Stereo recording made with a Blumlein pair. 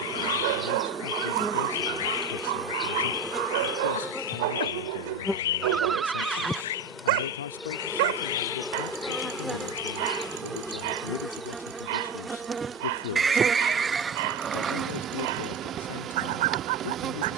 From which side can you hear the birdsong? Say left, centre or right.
left.